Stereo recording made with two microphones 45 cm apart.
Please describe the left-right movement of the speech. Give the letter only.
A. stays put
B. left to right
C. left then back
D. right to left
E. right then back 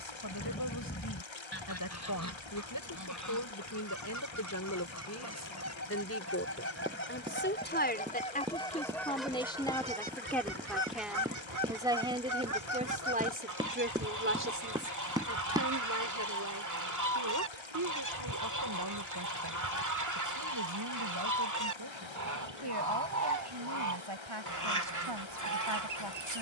B.